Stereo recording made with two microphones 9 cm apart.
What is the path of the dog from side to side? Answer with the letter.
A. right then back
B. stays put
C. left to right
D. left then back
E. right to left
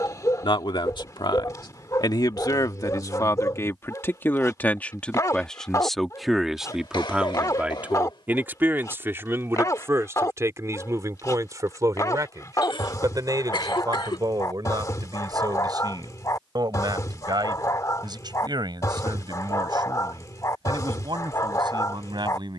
B.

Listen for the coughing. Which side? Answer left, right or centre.
left.